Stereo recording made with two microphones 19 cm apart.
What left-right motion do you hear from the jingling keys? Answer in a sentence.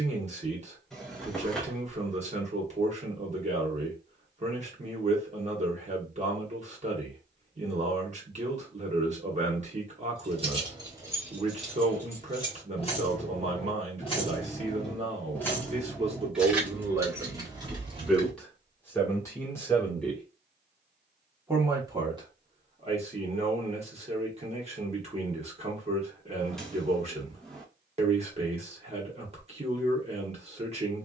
In this clip you hear the jingling keys move from right to left and back again.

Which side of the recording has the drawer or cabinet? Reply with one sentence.
You can hear the drawer or cabinet in the centre.